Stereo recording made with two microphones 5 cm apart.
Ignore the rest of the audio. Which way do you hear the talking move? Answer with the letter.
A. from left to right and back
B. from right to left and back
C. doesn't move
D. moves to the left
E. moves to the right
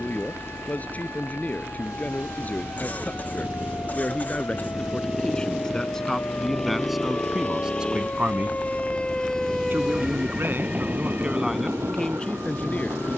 A.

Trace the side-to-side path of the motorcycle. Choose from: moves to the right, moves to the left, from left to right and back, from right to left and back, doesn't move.
moves to the left.